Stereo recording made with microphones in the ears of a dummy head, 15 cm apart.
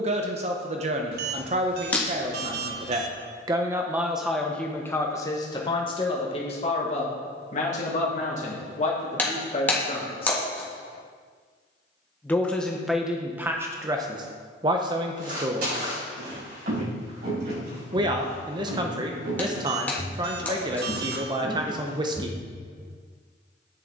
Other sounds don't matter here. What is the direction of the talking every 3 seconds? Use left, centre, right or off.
right, centre, left, left, centre, right, right, right.